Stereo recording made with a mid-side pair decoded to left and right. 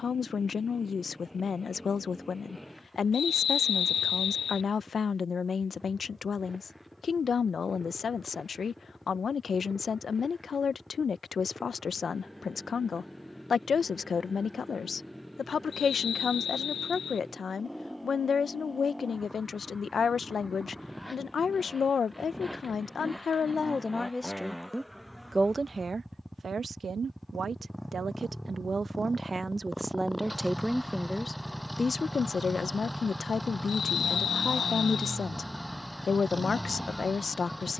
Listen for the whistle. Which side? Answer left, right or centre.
left.